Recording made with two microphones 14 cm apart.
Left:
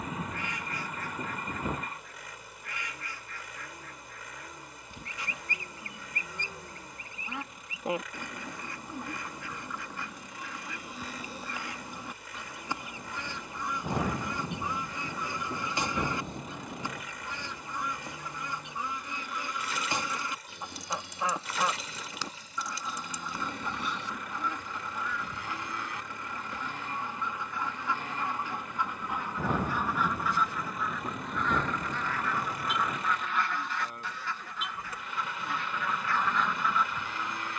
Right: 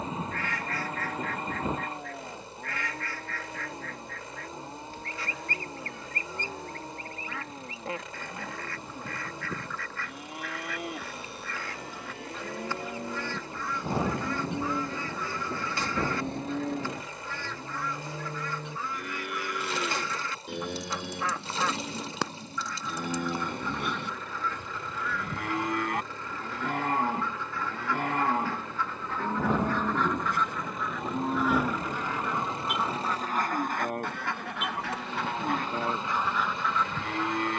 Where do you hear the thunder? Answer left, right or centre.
centre.